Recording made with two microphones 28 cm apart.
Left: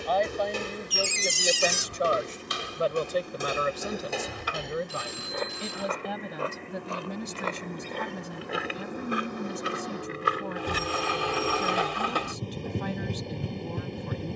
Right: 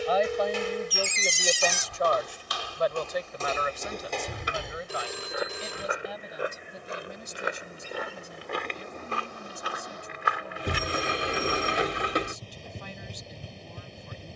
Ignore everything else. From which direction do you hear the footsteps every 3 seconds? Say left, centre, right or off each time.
left, centre, centre, left, off.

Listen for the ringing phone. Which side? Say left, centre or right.
right.